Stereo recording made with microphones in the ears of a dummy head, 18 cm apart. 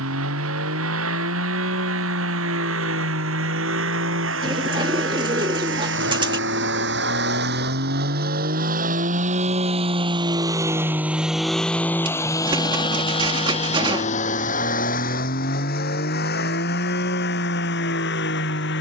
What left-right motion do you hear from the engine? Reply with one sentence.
You can hear the engine go from the right side to the left.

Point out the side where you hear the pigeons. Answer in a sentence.
In this clip you hear the pigeons on the right.